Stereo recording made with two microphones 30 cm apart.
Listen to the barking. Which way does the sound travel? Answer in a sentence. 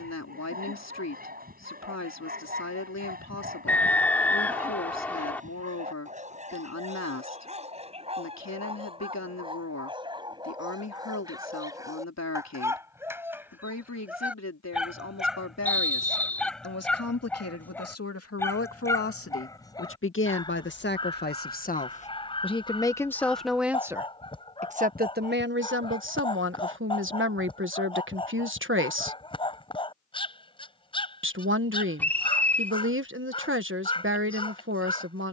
You can hear the barking travel towards the left.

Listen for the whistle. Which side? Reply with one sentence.
You can hear the whistle in the centre.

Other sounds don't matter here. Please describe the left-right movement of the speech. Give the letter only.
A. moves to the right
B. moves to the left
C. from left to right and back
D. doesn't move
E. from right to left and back
A.